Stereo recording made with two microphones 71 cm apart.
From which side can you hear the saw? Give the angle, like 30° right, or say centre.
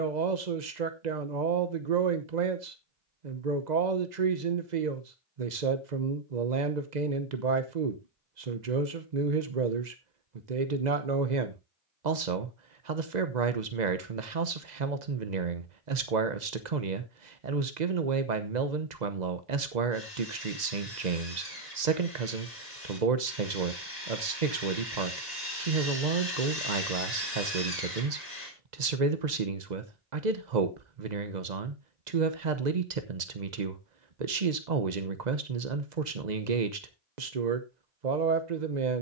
60° left.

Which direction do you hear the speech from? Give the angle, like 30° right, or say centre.
70° right.